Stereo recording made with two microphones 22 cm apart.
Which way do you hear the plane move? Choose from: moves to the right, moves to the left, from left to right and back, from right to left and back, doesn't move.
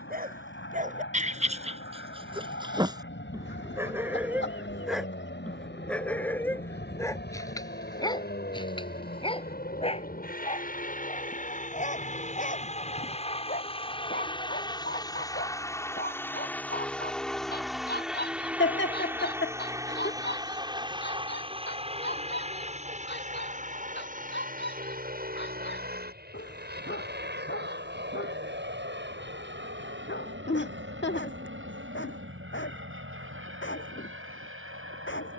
moves to the right.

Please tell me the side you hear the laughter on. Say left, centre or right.
left.